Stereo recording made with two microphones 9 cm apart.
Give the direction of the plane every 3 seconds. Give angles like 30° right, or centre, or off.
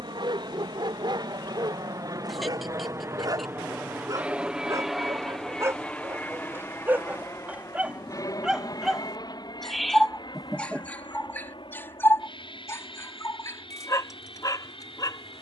50° right, 10° right, 30° left, 50° left, 60° left.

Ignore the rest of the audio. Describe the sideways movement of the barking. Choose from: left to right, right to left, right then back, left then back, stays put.
right to left.